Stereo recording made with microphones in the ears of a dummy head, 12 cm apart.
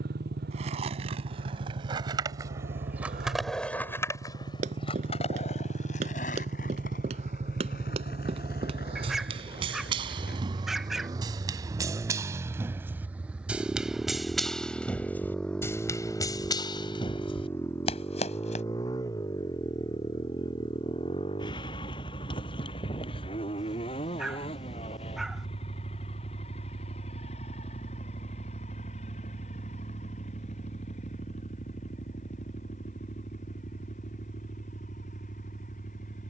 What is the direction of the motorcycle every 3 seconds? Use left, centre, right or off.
right, right, right, right, centre, centre, left, left, left, left, left, left.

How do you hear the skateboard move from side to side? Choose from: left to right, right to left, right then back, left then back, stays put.
right to left.